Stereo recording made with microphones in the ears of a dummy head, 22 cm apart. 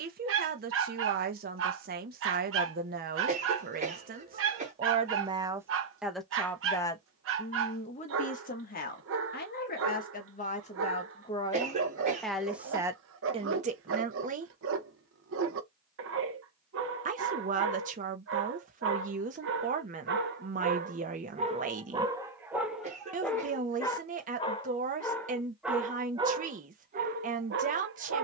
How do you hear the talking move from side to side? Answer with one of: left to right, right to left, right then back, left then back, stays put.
left then back.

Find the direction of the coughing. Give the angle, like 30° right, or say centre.
30° right.